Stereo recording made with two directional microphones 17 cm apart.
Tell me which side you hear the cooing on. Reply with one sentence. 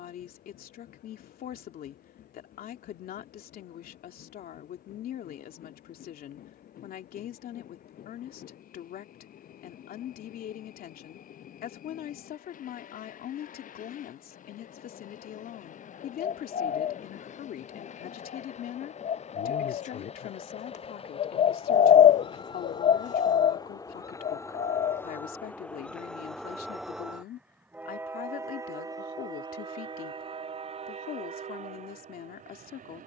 In this clip you hear the cooing on the left.